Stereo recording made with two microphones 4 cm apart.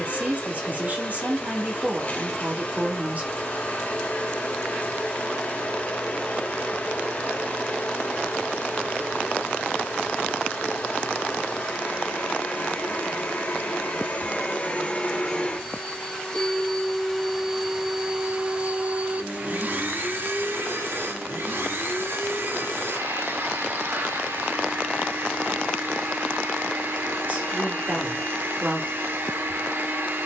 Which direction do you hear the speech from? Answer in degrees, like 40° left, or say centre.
40° right.